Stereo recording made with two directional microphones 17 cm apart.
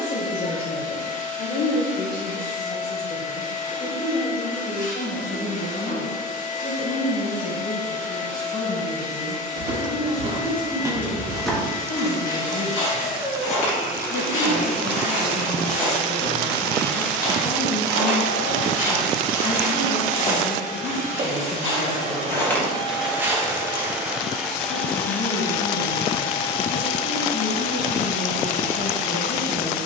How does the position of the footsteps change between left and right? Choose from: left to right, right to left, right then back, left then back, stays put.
left then back.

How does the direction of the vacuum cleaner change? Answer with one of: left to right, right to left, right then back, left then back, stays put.
right then back.